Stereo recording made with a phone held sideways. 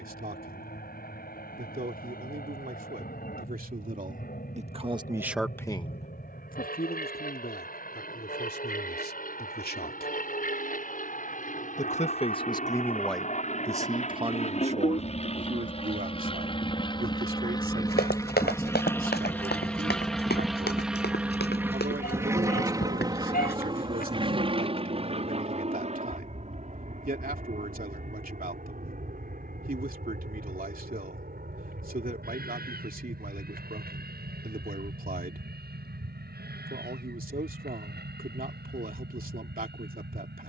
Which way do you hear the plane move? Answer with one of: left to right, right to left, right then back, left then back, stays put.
left to right.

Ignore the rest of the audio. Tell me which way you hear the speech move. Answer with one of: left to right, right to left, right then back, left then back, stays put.
left then back.